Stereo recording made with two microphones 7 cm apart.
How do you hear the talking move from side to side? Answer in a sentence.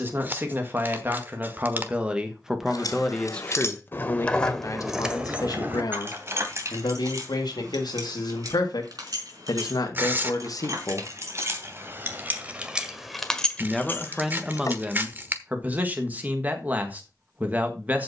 You can hear the talking go left and come back.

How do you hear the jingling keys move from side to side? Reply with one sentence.
You can hear the jingling keys move from left to right and back again.